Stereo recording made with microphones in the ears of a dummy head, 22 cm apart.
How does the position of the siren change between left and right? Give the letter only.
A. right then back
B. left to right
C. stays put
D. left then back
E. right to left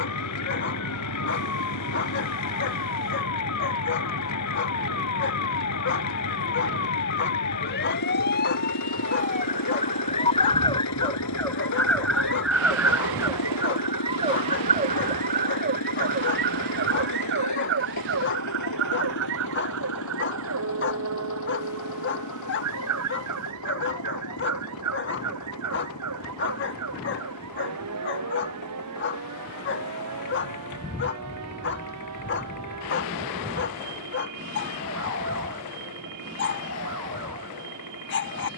B.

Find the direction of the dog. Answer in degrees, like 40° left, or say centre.
50° left.